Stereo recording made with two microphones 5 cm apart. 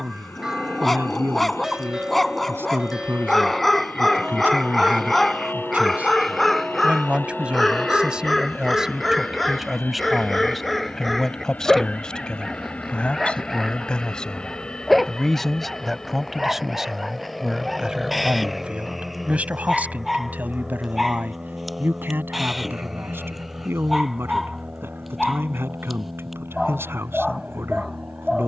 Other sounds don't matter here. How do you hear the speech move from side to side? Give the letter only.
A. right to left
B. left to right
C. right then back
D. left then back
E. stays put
D.